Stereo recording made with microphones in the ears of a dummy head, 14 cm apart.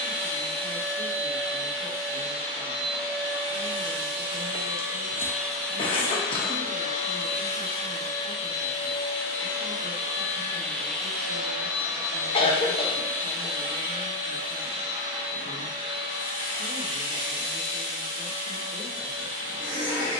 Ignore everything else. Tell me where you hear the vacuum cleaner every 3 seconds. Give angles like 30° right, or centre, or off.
40° right, 20° right, 40° left, 10° left, 30° right, 30° right, 30° right.